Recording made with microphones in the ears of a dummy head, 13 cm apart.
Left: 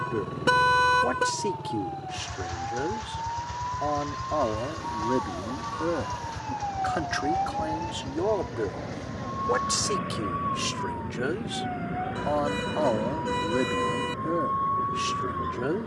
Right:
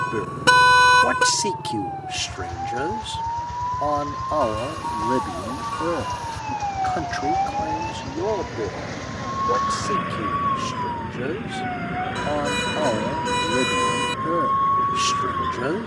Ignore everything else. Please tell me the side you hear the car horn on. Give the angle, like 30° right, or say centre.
40° right.